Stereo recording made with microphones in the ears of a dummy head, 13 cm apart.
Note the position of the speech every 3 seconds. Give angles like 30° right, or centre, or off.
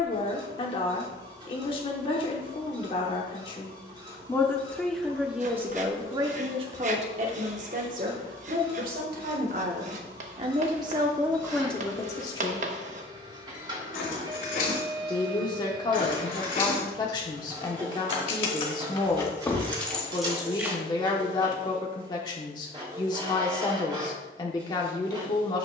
40° left, 10° left, 50° right, 30° right, 30° left, 30° left, 30° left, 30° left, 30° left.